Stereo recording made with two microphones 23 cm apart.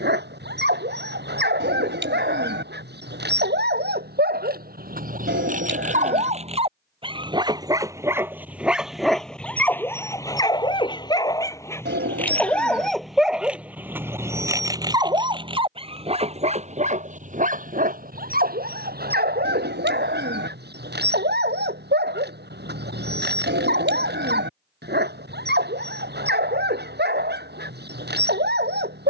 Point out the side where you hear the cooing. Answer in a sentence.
You can hear the cooing on the right.